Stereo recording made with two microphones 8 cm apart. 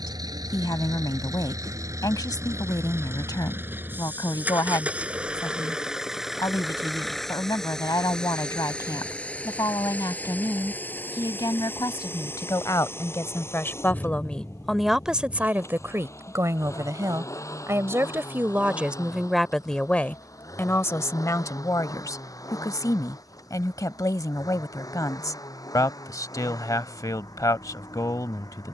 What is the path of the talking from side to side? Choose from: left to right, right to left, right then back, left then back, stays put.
right then back.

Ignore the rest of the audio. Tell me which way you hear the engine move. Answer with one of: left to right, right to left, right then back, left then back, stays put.
right to left.